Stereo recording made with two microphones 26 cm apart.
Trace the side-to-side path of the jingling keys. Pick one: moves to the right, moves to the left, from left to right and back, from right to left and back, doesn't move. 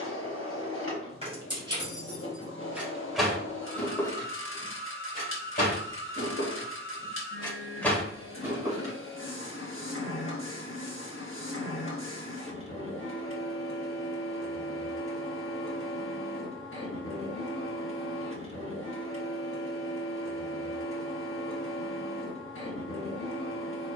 from right to left and back.